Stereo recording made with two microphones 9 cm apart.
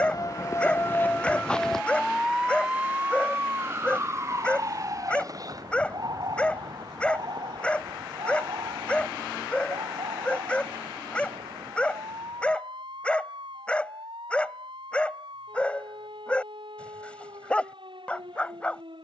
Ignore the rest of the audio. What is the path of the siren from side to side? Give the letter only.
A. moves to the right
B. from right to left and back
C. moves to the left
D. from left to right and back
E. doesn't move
A.